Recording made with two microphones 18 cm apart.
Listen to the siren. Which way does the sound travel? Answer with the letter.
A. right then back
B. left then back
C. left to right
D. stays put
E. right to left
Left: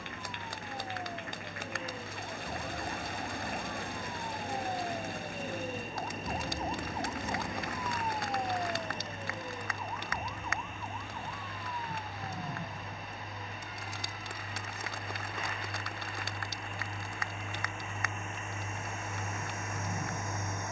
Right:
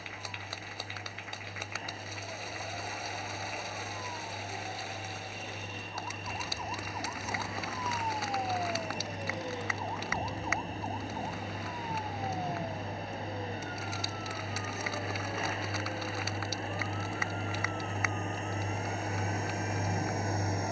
C.